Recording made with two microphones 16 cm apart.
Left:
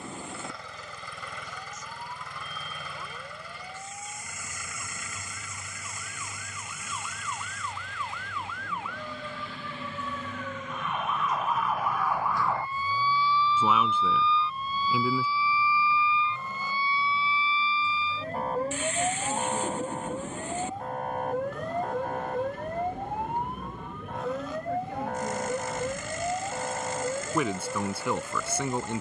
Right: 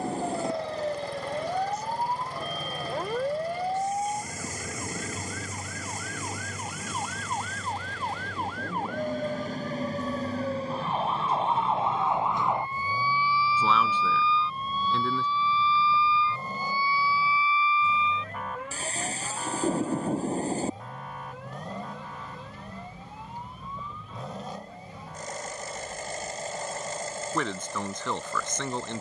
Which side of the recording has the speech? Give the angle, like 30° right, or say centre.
10° left.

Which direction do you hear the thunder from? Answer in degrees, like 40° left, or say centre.
40° right.